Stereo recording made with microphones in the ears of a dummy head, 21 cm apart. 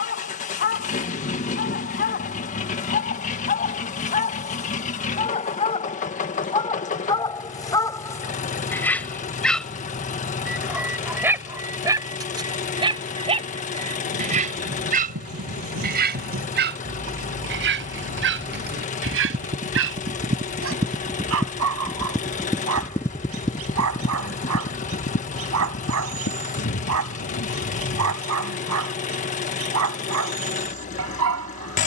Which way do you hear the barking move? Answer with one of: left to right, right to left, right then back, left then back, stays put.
left to right.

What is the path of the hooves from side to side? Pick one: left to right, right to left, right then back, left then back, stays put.
right to left.